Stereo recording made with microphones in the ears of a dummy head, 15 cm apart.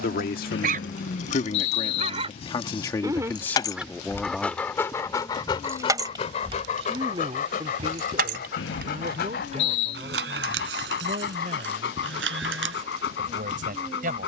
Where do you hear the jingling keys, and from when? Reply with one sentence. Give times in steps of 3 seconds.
In this clip you hear the jingling keys on the left from 0 s, in the centre from 3 s and on the right from 6 s.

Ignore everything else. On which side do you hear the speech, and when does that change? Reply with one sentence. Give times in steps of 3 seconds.
In this clip you hear the speech on the left from 0 s, in the centre from 3 s and on the right from 6 s.